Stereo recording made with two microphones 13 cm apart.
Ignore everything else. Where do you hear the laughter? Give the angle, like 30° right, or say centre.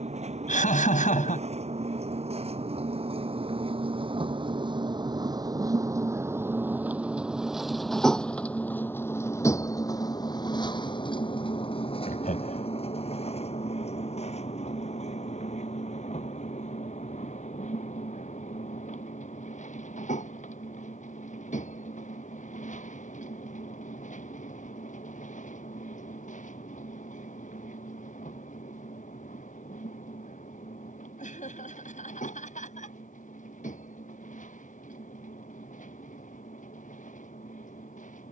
80° left.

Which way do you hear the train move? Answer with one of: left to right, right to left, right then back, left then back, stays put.
right to left.